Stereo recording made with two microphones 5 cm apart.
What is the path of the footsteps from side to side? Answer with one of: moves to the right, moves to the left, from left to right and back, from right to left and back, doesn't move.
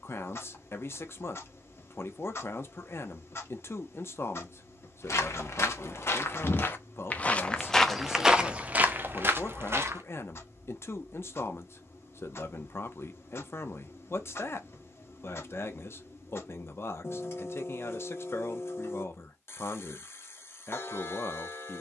moves to the right.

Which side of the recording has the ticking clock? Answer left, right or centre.
left.